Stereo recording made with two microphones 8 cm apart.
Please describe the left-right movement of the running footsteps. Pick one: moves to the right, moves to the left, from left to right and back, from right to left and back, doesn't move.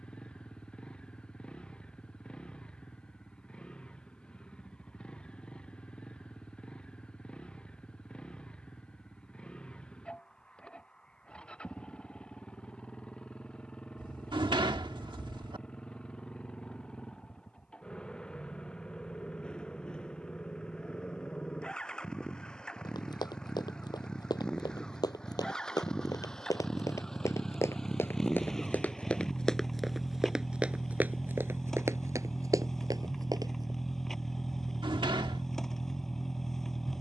moves to the right.